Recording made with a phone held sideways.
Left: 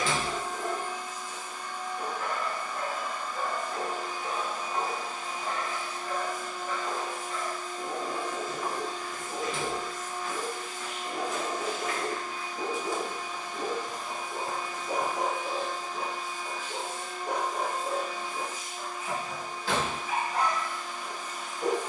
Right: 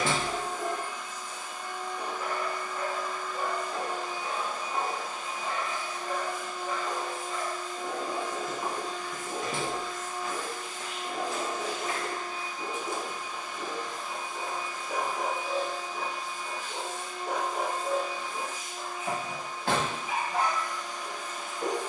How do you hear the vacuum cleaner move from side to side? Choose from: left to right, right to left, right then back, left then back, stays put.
stays put.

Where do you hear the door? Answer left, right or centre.
right.